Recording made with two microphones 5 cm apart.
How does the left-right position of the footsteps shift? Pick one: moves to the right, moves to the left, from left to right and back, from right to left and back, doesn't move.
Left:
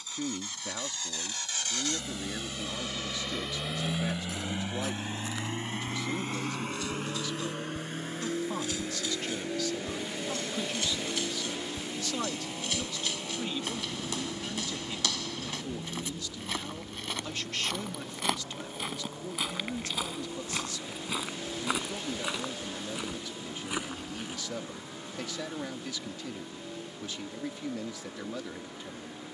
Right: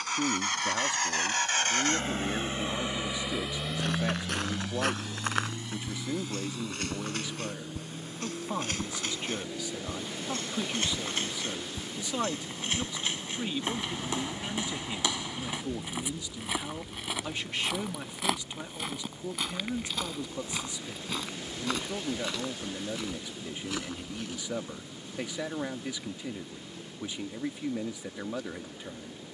moves to the left.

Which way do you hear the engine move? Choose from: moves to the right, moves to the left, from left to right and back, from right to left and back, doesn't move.
moves to the left.